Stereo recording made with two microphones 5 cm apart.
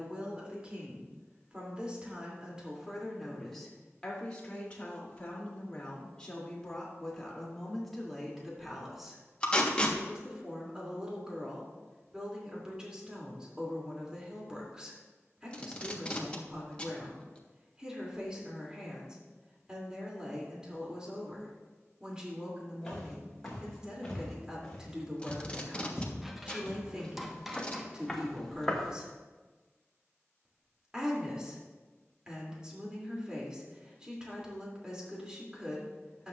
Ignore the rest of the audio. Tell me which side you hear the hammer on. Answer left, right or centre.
centre.